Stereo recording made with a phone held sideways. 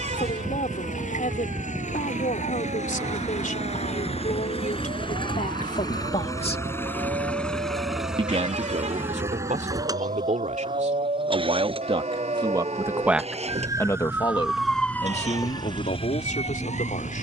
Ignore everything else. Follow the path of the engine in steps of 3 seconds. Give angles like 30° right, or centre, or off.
60° left, 40° left, 10° left, 30° right, 50° right, 60° right.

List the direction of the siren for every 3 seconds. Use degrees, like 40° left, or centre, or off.
70° right, 70° right, 70° right, 60° right, 30° right, 40° left.